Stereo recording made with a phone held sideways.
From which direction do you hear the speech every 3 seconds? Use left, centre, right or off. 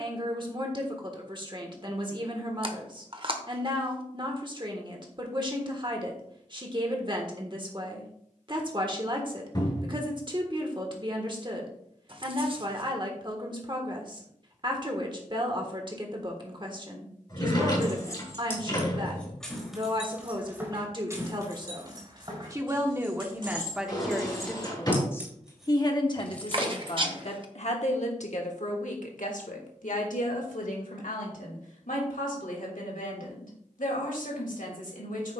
right, right, right, right, right, right, right, right, left, left, left, left.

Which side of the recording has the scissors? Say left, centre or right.
right.